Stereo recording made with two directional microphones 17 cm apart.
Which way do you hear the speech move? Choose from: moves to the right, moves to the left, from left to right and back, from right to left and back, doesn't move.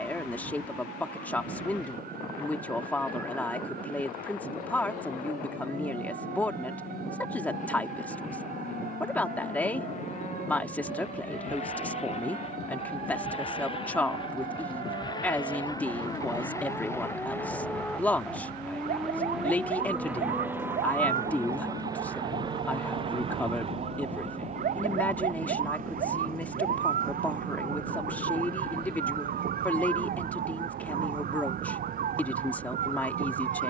doesn't move.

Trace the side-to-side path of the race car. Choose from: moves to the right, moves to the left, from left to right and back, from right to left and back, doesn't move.
moves to the right.